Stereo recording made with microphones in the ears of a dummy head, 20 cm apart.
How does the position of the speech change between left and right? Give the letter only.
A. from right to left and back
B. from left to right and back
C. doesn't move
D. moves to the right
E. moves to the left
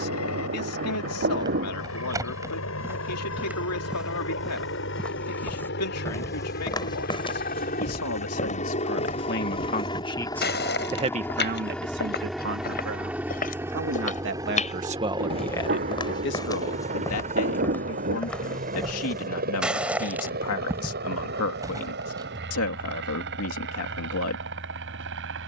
B.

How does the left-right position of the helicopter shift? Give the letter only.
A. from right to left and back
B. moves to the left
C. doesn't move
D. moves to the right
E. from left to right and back
D.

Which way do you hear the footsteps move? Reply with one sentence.
In this clip you hear the footsteps move from right to left and back again.